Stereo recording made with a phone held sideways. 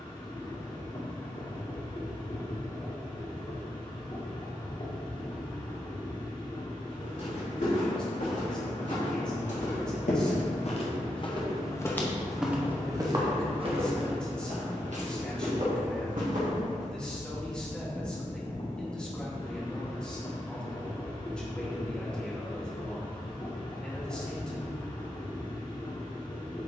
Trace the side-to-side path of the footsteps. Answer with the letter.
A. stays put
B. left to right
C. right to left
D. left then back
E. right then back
B.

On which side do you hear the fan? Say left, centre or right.
left.